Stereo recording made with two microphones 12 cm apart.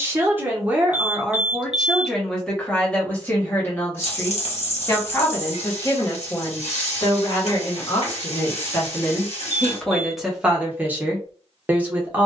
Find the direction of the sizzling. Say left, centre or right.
left.